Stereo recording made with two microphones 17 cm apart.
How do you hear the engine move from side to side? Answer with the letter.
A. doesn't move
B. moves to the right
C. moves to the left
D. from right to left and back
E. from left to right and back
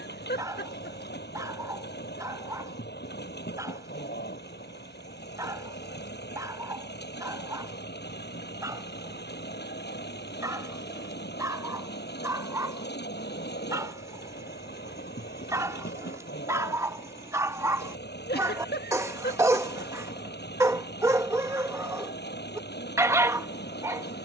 A.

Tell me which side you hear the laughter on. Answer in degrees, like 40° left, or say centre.
80° left.